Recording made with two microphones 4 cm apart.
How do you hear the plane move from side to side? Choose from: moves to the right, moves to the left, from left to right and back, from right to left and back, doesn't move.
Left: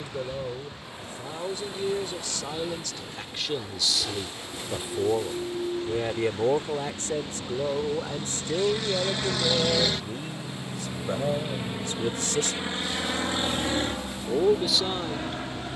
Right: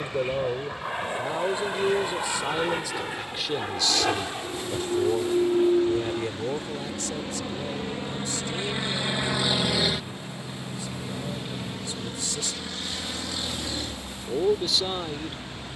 moves to the left.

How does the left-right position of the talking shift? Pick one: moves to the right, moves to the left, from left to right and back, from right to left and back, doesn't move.
from right to left and back.